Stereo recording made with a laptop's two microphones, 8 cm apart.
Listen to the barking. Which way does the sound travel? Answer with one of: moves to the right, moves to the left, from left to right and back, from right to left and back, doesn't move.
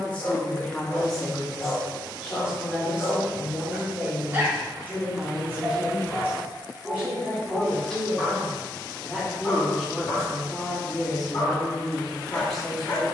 from left to right and back.